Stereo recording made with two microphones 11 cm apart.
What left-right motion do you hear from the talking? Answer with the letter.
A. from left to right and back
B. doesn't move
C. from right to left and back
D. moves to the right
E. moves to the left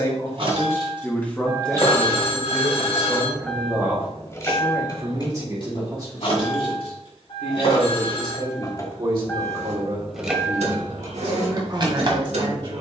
D.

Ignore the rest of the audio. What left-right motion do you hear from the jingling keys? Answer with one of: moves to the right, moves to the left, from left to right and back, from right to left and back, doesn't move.
from right to left and back.